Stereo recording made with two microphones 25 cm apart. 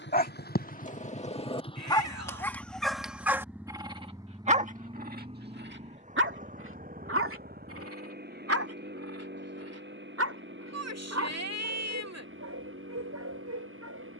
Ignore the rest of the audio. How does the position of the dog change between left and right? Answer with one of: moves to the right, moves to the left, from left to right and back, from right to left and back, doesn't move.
moves to the right.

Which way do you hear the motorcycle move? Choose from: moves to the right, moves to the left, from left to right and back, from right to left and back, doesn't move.
moves to the right.